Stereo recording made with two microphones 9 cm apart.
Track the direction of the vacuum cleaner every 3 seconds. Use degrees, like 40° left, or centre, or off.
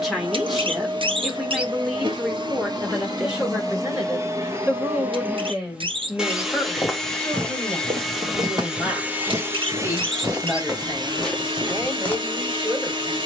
50° right, 30° right, centre, 40° right, 50° right.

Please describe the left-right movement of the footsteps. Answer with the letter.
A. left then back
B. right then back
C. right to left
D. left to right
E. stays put
B.